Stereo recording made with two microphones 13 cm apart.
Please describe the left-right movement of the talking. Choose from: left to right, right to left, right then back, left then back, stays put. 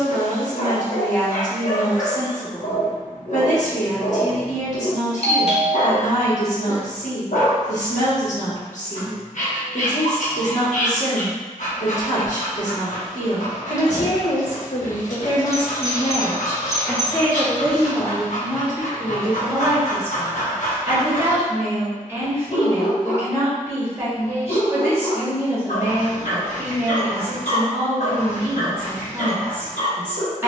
left to right.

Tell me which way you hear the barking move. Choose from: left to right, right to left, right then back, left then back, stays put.
stays put.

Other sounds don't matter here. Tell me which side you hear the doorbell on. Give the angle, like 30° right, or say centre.
50° left.